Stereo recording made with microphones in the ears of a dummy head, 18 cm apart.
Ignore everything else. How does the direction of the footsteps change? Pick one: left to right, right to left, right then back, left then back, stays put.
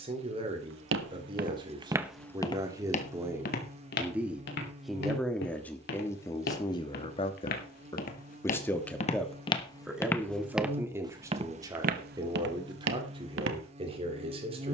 left then back.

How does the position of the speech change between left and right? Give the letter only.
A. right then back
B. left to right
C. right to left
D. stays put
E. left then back
E.